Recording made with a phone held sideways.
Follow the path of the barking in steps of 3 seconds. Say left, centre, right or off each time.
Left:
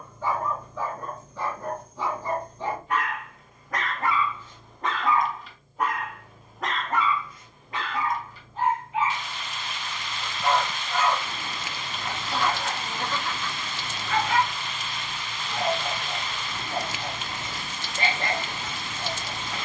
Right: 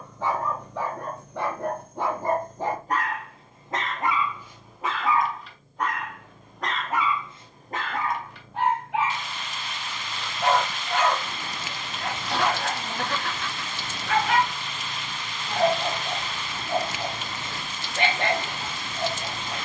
right, centre, right, right, right, right, right.